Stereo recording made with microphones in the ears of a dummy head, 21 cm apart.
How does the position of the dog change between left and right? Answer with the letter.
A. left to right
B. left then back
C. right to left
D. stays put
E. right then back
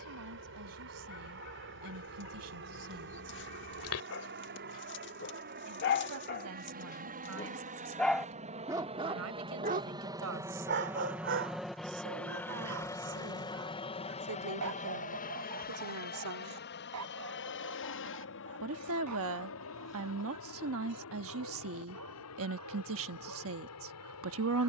A.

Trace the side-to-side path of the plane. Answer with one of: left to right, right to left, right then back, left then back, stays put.
right to left.